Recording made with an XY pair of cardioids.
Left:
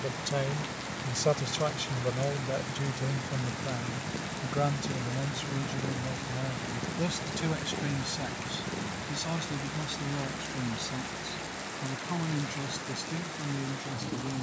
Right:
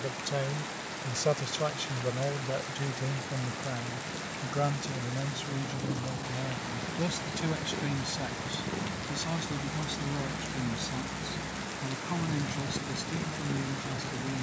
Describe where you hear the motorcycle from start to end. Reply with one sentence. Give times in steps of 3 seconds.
In this clip you hear the motorcycle on the left from 0 s, in the centre from 6 s and on the right from 9 s.